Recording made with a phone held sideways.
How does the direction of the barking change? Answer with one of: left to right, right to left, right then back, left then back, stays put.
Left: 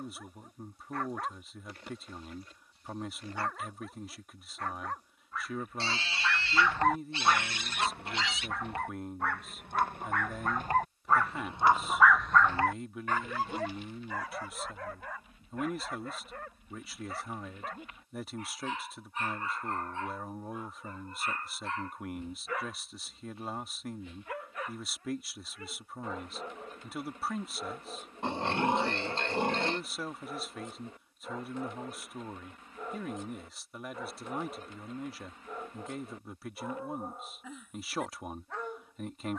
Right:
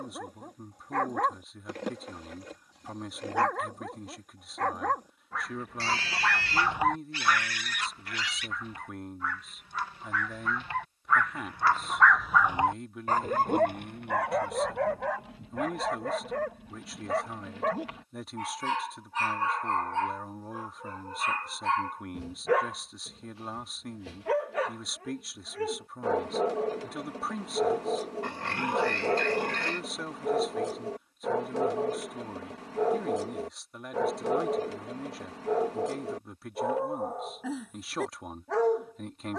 left then back.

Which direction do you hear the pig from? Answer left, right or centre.
left.